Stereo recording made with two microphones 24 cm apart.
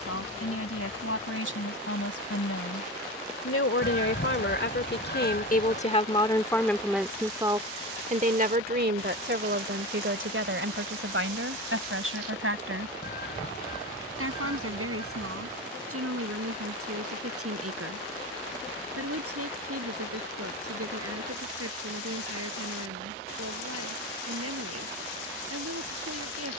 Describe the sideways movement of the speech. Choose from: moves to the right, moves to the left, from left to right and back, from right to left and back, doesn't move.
moves to the right.